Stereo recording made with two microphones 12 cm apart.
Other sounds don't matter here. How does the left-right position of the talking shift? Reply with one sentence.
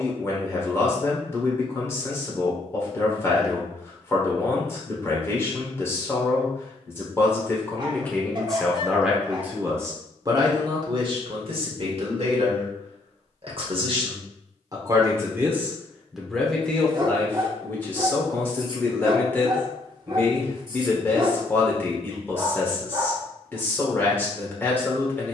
In this clip you hear the talking move from left to right and back again.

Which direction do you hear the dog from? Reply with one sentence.
You can hear the dog on the right.